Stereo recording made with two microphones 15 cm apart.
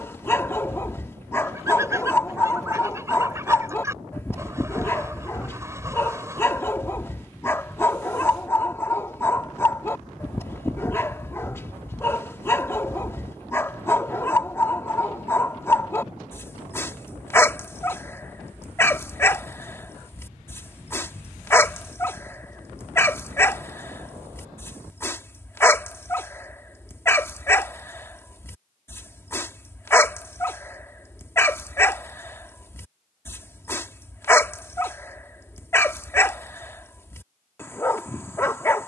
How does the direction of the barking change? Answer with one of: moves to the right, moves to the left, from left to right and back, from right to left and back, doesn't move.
doesn't move.